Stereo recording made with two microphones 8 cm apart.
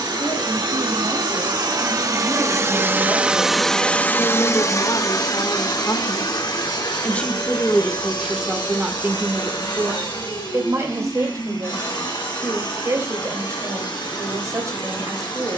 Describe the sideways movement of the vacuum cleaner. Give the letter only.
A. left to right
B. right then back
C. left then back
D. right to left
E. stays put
D.